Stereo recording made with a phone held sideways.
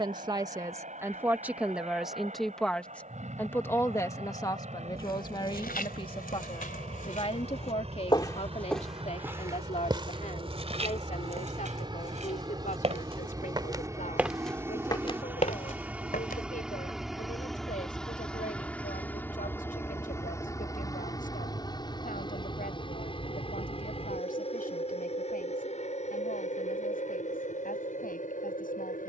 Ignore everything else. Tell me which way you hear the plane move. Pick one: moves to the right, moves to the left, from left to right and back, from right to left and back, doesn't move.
moves to the left.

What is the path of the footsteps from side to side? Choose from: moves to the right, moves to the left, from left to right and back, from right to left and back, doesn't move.
from left to right and back.